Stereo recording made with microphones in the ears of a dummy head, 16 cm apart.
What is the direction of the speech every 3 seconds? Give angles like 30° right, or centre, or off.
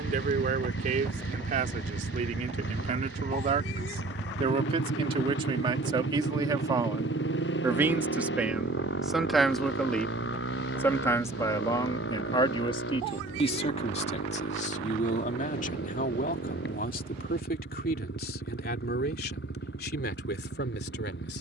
50° right, 30° right, 20° right, 10° left, 40° left, 50° left, 60° left.